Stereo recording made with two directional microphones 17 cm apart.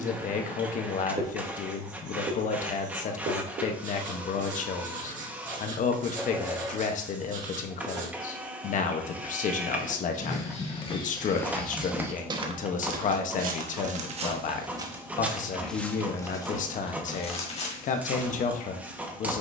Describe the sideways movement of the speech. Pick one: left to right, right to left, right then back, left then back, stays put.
stays put.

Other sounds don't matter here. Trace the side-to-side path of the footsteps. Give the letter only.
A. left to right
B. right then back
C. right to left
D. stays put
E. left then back
B.